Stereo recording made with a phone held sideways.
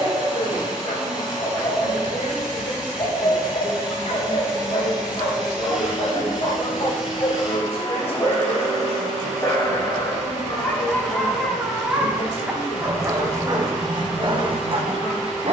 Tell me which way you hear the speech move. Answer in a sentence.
You can hear the speech stay put.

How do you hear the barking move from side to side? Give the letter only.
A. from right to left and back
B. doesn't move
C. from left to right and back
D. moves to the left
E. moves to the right
E.